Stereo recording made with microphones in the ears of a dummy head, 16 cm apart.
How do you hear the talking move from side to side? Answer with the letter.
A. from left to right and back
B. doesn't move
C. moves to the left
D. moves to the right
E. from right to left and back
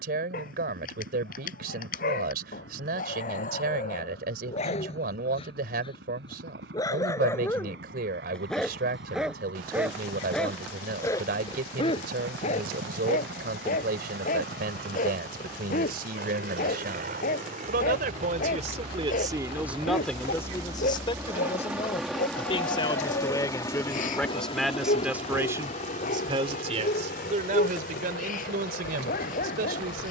E.